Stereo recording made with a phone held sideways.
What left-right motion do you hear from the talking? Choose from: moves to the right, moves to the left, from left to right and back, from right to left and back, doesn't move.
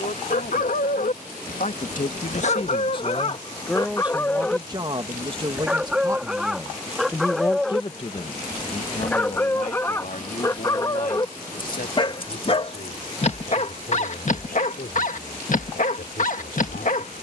from left to right and back.